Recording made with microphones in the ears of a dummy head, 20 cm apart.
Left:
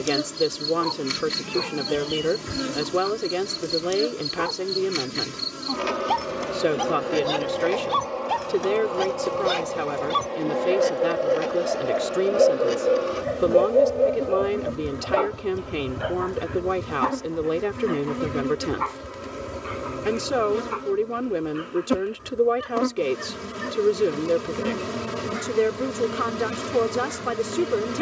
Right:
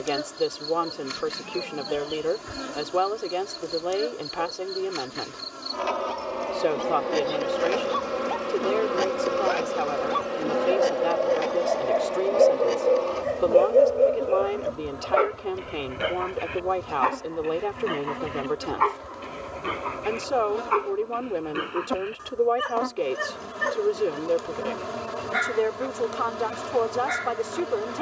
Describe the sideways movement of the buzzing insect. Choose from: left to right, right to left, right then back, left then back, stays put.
right then back.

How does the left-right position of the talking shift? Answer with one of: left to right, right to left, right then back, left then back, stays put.
stays put.